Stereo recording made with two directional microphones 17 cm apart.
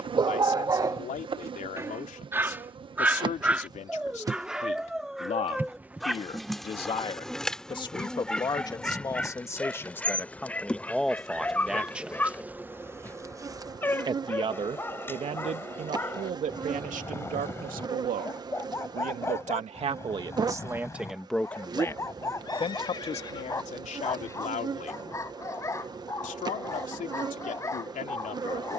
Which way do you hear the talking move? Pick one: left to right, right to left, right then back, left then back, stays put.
right then back.